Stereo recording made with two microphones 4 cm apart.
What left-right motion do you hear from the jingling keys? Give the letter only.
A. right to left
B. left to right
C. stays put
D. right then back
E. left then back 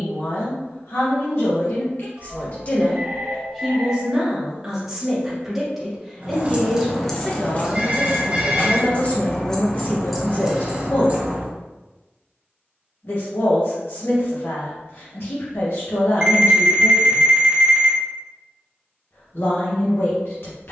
E.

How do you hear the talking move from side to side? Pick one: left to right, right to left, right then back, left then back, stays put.
right then back.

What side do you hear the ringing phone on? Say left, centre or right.
right.